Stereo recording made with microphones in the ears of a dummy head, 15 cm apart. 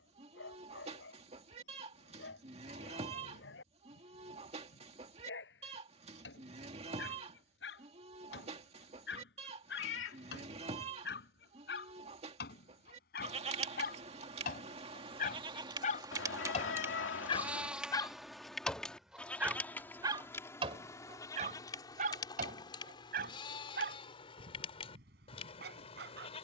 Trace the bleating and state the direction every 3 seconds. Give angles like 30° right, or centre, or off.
40° right, 40° right, 40° right, 40° right, 40° right, 20° right, 10° left, 30° left, 40° left.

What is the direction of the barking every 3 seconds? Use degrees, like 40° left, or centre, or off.
80° left, 80° left, 70° left, 70° left, 60° left, 40° left, 10° right, 60° right, 70° right.